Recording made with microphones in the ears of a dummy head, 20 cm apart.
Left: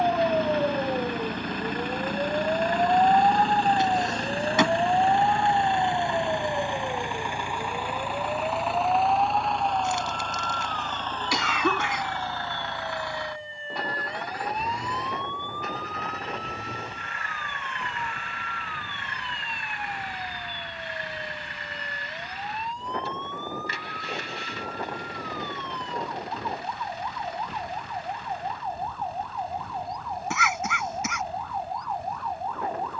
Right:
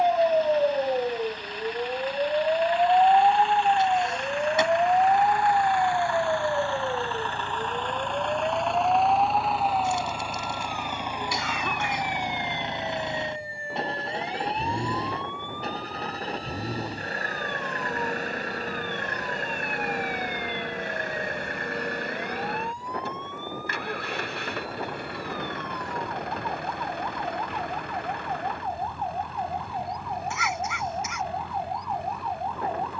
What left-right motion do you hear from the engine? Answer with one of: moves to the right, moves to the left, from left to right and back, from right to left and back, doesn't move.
moves to the right.